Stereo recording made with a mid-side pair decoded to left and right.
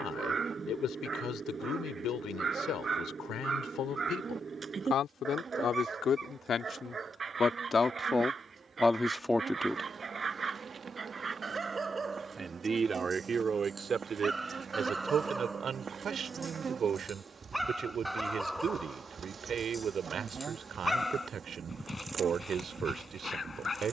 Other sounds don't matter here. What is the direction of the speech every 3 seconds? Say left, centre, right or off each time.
left, left, left, centre, right, right, right, right.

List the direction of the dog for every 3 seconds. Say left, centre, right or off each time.
right, right, right, right, right, centre, centre, left.